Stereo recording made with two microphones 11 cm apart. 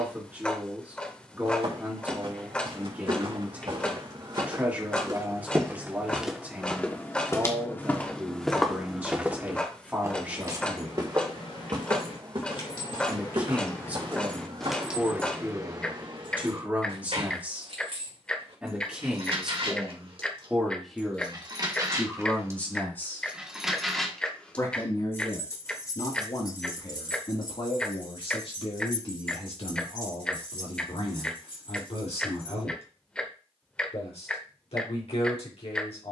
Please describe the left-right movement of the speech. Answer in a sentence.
You can hear the speech travel towards the left.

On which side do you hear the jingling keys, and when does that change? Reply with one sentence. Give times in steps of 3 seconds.
You can hear the jingling keys not at all from 0 s, on the left from 9 s, on the right from 15 s, on the left from 24 s and not at all from 33 s.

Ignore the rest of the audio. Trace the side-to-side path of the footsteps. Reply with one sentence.
In this clip you hear the footsteps move from right to left and back again.